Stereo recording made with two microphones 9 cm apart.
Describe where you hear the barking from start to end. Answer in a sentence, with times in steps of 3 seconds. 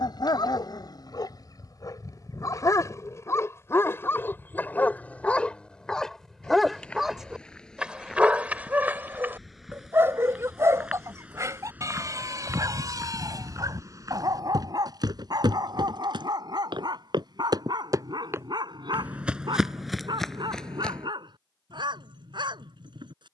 You can hear the barking on the left from 0 s, in the centre from 6 s and on the right from 9 s.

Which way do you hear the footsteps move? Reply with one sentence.
You can hear the footsteps move from left to right and back again.